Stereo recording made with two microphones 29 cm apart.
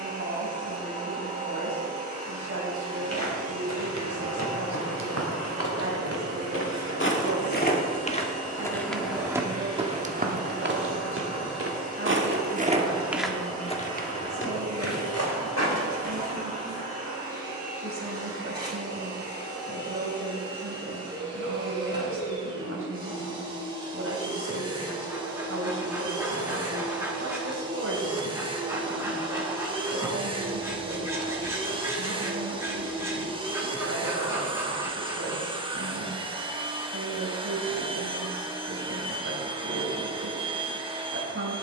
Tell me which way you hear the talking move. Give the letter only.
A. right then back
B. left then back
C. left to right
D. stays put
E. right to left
D.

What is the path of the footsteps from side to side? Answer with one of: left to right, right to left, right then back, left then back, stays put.
right then back.